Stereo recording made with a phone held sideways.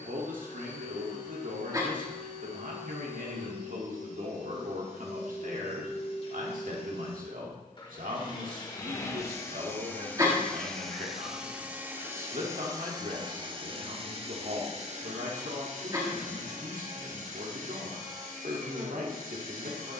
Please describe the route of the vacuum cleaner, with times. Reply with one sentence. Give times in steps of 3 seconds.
You can hear the vacuum cleaner on the left from 0 s, in the centre from 9 s and on the right from 12 s.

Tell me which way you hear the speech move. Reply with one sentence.
In this clip you hear the speech stay in one place.